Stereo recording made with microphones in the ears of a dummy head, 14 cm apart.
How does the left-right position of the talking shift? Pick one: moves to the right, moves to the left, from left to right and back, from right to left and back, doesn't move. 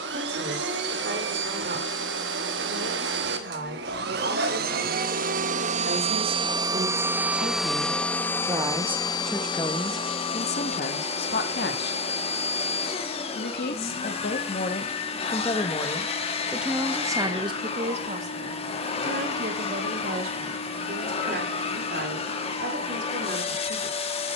from right to left and back.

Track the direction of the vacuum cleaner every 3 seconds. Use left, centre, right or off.
right, right, centre, left, left, left, left, left.